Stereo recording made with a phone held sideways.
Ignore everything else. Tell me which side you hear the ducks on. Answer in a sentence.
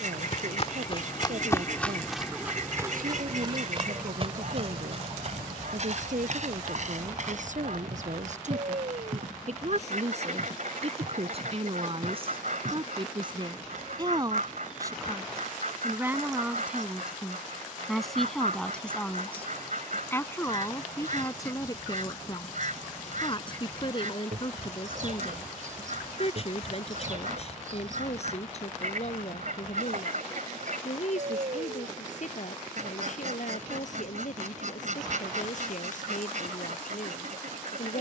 In this clip you hear the ducks on the right.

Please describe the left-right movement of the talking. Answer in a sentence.
You can hear the talking travel towards the left.